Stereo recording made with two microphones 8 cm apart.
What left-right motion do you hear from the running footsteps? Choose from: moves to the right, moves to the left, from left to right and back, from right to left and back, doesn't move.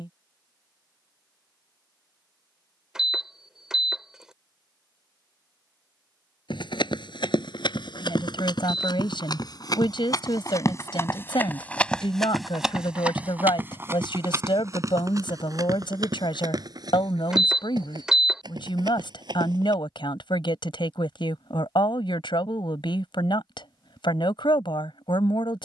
moves to the right.